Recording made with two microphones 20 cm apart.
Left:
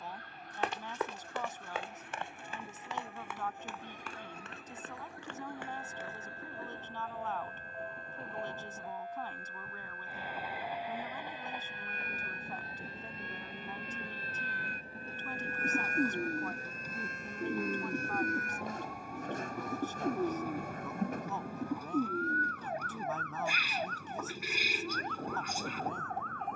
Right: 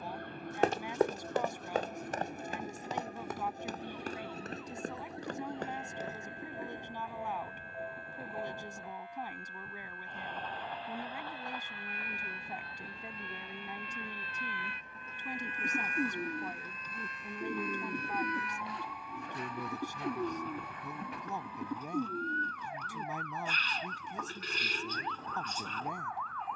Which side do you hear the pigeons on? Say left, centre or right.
centre.